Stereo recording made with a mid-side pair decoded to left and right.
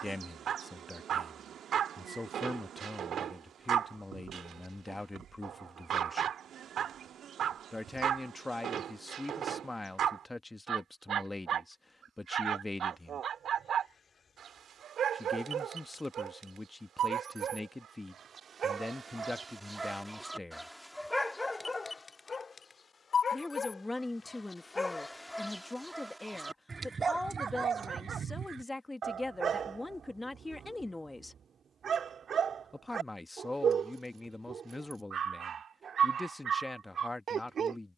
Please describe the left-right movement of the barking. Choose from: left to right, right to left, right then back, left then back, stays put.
left then back.